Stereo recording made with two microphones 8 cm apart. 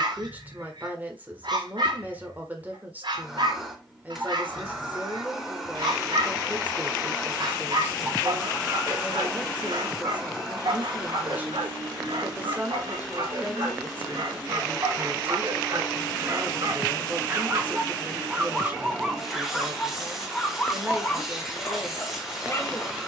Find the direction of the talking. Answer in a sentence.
You can hear the talking on the right.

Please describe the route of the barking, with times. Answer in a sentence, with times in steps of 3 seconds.
You can hear the barking on the right from 0 s, in the centre from 18 s and on the left from 21 s.